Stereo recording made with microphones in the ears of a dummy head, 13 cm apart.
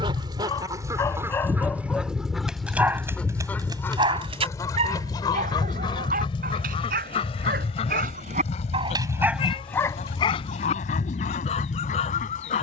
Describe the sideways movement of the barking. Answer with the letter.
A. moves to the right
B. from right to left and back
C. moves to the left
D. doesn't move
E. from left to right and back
E.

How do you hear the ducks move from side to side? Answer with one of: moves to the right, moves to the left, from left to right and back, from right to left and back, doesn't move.
moves to the left.